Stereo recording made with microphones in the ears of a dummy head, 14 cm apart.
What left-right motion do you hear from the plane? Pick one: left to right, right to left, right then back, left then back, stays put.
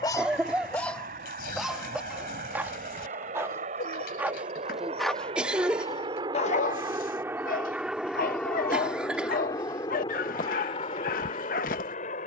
right to left.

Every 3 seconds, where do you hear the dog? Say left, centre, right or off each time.
centre, centre, left, left.